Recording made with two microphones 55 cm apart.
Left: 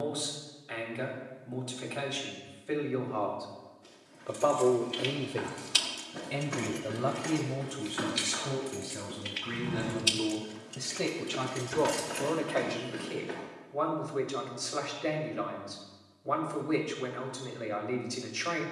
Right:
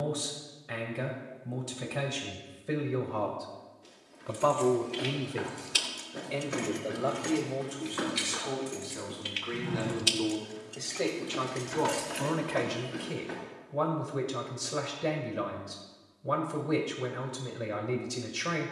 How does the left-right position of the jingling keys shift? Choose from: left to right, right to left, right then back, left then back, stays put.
right then back.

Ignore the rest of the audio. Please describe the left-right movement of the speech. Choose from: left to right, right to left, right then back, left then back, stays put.
left then back.